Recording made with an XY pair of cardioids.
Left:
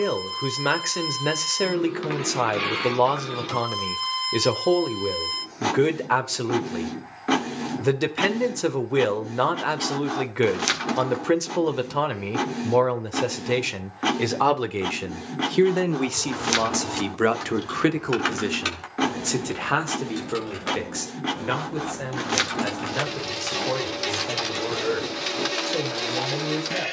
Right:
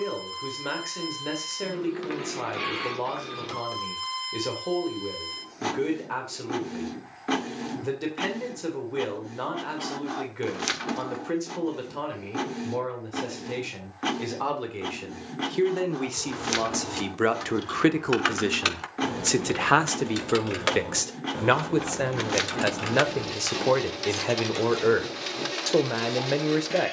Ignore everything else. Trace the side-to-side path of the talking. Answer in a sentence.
In this clip you hear the talking move from left to right.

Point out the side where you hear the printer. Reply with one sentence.
You can hear the printer on the left.